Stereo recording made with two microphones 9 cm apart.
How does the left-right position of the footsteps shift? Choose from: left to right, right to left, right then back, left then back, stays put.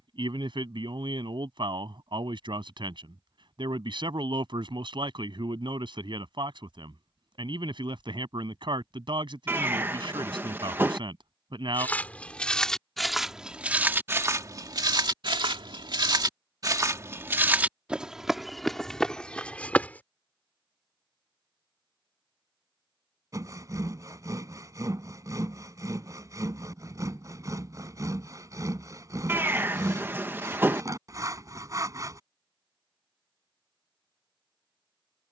right then back.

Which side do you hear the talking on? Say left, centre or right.
right.